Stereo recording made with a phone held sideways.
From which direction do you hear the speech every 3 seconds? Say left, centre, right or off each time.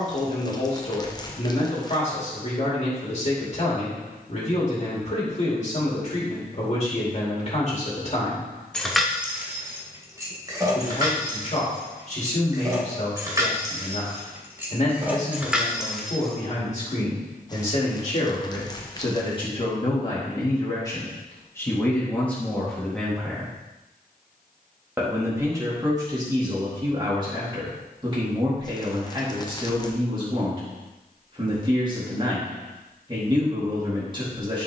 left, left, left, left, left, left, left, centre, right, right, right, right.